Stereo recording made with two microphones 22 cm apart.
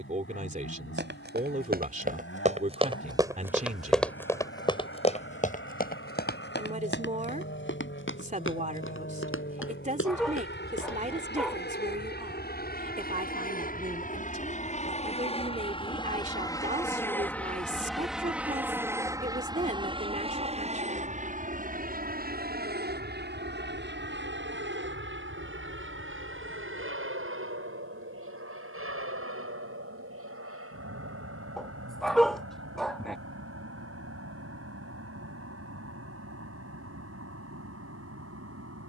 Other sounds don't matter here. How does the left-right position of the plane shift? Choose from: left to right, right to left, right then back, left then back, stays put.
left to right.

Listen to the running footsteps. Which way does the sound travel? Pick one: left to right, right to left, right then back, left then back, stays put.
right to left.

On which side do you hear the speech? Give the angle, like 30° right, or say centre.
30° right.